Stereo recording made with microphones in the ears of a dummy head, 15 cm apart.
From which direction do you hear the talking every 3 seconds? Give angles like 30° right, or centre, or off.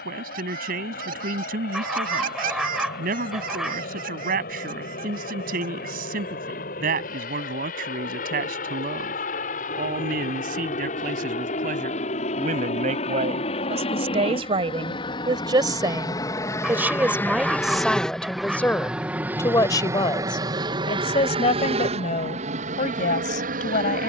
60° right, 60° right, 60° right, 50° right, 40° right, 10° right, 20° left, 40° left.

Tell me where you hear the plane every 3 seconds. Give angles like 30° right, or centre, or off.
60° left, 60° left, 60° left, 50° left, 40° left, 20° left, 10° right, 40° right.